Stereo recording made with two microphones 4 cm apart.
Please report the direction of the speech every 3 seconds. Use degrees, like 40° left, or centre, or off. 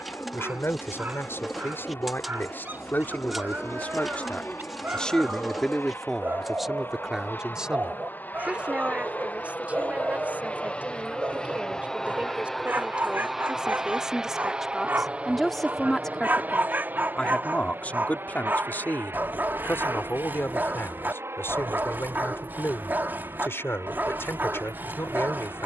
60° left, 30° left, 10° right, 30° right, 20° right, 20° left, 50° left, 70° left, 70° left.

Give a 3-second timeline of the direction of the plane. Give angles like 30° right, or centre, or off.
70° left, 60° left, 50° left, 30° left, 10° right, 40° right, 60° right, 70° right, 70° right.